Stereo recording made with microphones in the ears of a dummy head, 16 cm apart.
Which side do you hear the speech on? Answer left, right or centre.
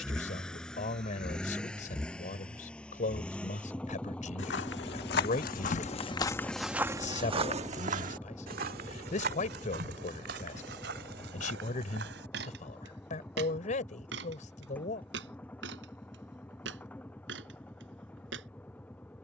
left.